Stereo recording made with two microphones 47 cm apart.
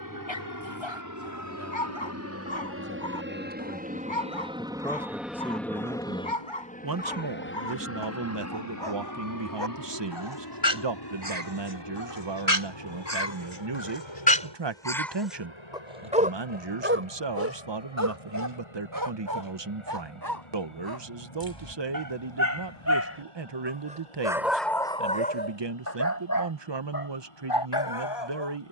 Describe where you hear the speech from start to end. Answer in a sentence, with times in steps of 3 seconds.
In this clip you hear the speech on the left from 0 s, in the centre from 3 s and on the right from 6 s.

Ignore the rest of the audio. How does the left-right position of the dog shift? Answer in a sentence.
You can hear the dog move from left to right and back again.